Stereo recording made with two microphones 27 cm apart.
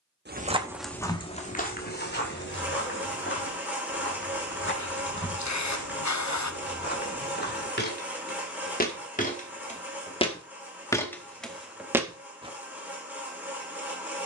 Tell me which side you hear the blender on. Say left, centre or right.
centre.